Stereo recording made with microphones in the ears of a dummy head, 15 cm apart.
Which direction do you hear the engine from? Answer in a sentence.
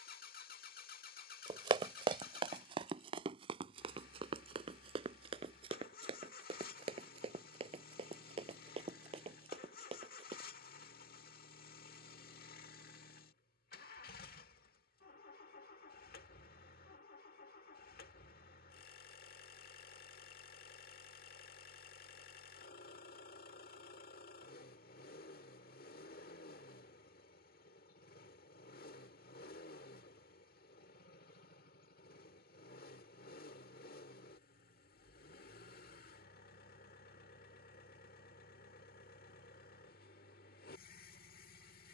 In this clip you hear the engine on the left.